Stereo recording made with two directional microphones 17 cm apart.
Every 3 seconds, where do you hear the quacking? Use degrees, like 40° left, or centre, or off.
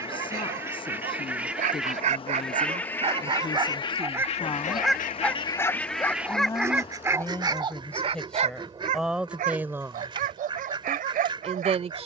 10° right, 30° left, 20° right, 30° right.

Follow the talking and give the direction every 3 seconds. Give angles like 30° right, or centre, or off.
30° left, 30° left, 10° left, 20° right.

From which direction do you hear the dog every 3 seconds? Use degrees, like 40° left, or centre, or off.
50° right, 10° right, 20° right, 50° right.